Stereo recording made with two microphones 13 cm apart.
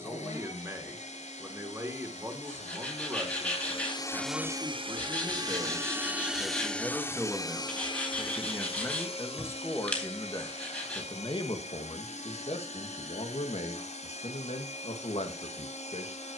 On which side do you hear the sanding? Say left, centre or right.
centre.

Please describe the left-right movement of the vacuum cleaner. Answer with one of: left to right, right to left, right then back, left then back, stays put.
right then back.